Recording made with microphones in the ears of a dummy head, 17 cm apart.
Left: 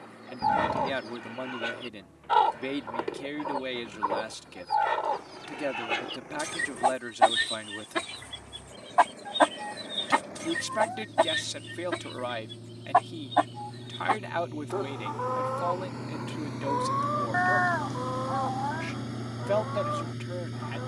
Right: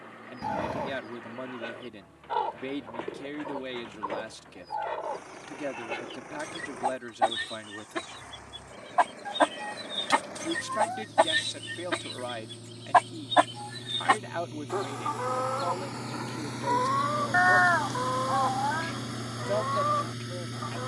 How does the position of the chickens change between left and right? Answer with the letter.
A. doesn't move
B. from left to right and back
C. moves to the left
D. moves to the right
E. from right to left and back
D.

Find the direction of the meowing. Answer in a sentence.
You can hear the meowing on the right.